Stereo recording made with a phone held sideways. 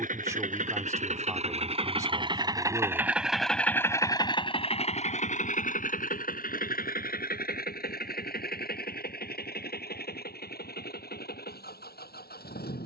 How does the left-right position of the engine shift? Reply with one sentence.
In this clip you hear the engine move from right to left.